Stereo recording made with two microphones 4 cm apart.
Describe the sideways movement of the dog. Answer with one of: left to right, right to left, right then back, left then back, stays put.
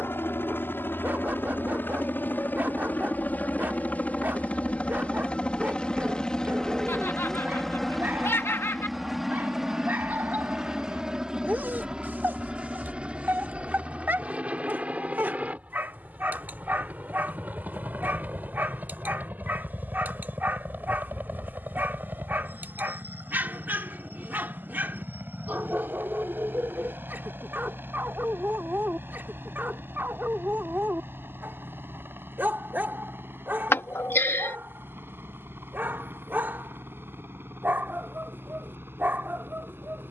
stays put.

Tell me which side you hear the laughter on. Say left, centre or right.
left.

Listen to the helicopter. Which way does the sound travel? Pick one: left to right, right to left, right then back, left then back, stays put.
left to right.